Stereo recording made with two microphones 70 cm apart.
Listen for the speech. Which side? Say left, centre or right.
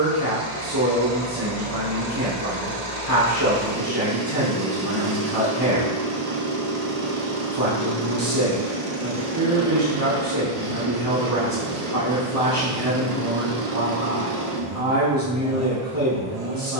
right.